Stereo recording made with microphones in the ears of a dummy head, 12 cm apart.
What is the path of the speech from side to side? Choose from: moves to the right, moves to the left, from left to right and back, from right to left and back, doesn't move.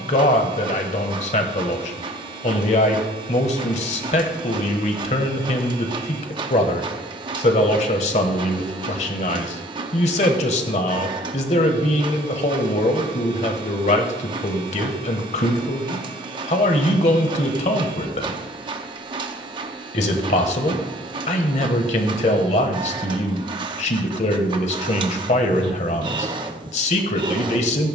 doesn't move.